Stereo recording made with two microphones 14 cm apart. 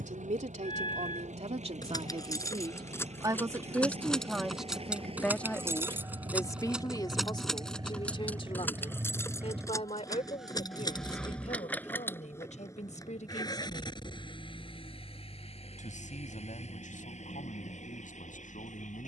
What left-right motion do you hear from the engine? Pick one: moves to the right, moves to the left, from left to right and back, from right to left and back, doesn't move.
moves to the left.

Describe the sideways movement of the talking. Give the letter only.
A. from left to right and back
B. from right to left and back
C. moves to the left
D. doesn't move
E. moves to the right
C.